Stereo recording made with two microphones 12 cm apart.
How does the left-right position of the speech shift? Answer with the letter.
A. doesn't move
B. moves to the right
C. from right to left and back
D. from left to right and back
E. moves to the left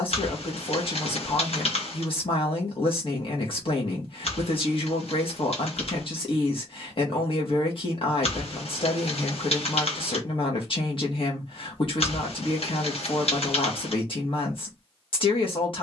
A.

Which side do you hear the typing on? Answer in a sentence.
You can hear the typing on the left.